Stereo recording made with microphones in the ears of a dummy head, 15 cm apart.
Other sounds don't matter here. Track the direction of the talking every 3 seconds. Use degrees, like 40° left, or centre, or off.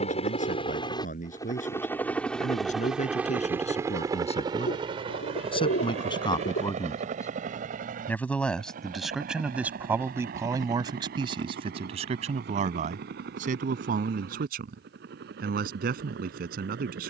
50° left, 40° left, 20° left, 20° right, 50° right, 60° right.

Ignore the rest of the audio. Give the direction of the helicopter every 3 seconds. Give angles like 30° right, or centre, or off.
20° left, 20° right, 50° right, 60° right, 60° right, 70° right.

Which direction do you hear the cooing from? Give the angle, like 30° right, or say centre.
80° left.